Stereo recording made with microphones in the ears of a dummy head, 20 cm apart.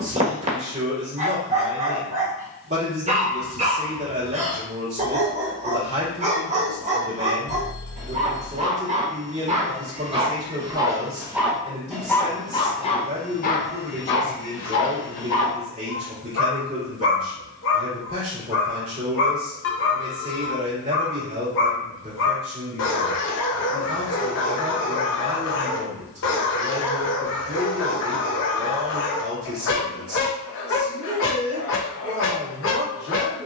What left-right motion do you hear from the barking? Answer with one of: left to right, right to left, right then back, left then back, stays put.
right to left.